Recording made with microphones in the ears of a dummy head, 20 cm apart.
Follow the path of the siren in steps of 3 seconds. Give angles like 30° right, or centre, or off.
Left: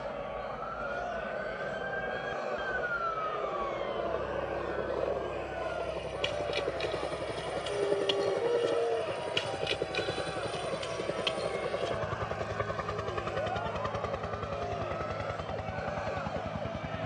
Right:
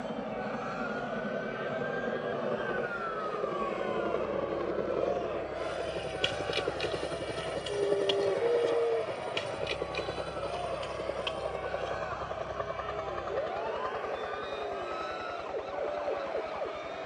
40° left, 10° left, 10° right, 30° right, 40° right, 50° right.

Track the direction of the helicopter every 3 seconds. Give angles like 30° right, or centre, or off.
40° right, 30° right, centre, 20° left, 40° left, 50° left.